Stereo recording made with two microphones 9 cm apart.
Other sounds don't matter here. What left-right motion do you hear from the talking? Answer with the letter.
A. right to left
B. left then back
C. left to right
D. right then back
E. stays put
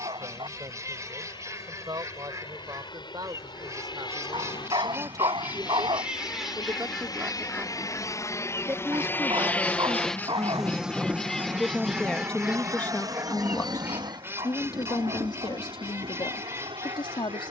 A.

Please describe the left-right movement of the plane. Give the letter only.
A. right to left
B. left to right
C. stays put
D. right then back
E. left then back
B.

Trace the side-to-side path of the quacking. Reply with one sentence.
You can hear the quacking move from right to left and back again.